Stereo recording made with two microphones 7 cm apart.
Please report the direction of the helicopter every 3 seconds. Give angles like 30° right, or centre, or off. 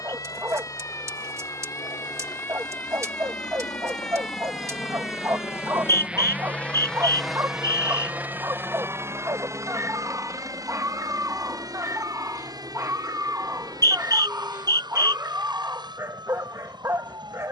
70° left, 50° left, centre, 50° right, 70° right, 70° right.